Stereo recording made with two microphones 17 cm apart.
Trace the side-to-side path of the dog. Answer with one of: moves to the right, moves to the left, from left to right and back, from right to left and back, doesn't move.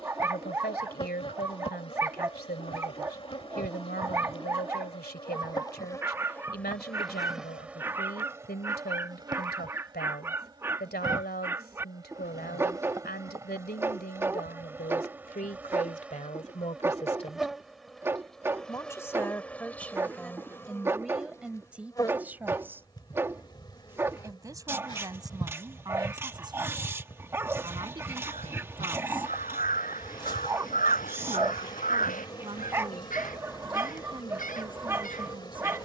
doesn't move.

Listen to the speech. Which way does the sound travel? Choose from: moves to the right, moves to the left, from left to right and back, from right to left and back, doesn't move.
moves to the right.